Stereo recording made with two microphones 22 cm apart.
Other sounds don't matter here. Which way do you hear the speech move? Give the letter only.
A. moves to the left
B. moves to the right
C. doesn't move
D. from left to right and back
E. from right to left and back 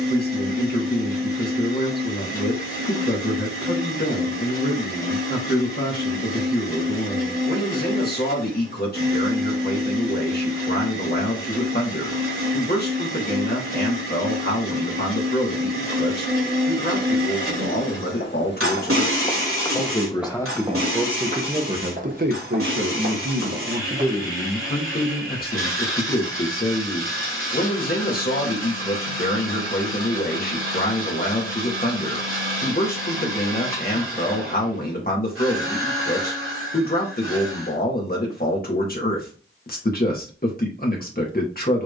D.